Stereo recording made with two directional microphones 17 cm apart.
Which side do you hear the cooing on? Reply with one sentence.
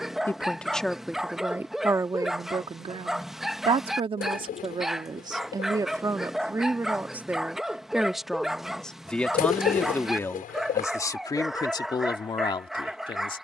You can hear the cooing on the left.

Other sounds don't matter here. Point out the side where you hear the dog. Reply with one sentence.
In this clip you hear the dog in the centre.